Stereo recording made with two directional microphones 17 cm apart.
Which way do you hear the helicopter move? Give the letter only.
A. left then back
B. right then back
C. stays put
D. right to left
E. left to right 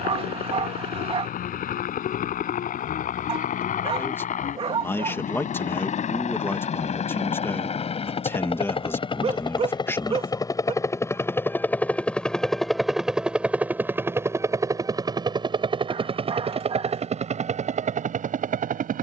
E.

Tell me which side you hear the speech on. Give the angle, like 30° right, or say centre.
10° left.